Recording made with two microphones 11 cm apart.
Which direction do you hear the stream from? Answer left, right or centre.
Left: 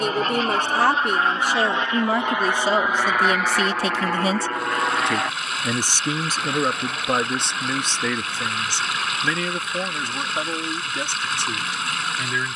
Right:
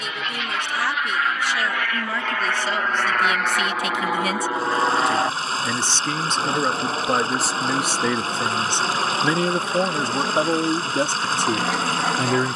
right.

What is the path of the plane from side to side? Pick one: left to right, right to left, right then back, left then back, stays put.
left to right.